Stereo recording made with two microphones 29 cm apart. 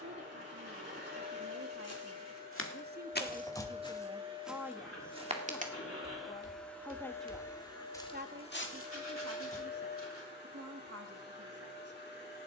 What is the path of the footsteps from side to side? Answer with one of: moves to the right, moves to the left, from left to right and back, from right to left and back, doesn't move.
from left to right and back.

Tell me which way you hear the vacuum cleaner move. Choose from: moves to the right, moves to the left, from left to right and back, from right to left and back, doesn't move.
moves to the left.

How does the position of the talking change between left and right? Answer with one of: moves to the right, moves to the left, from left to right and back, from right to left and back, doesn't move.
from right to left and back.